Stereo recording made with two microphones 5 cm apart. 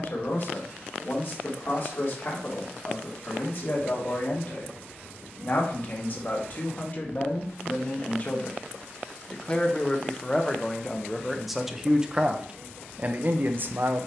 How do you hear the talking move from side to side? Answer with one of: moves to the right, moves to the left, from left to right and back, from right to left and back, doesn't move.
moves to the right.